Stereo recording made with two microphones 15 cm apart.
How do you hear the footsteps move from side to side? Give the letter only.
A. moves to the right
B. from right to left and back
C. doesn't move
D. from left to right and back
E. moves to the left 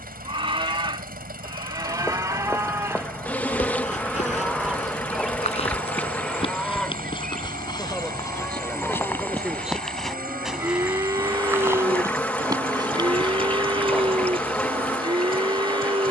A.